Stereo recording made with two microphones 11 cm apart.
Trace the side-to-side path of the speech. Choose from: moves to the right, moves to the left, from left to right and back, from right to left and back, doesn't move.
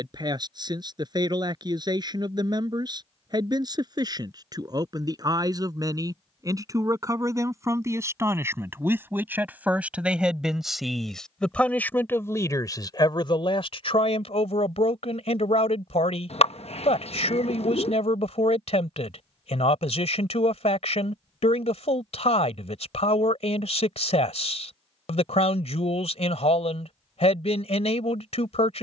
moves to the left.